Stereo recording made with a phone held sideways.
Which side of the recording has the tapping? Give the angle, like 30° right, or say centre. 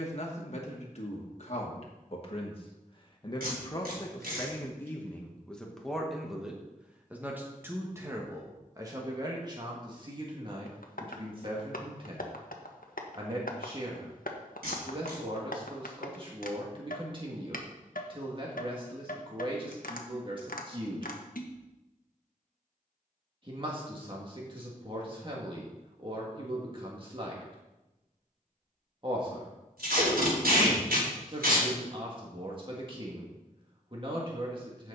70° left.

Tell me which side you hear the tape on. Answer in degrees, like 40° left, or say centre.
90° right.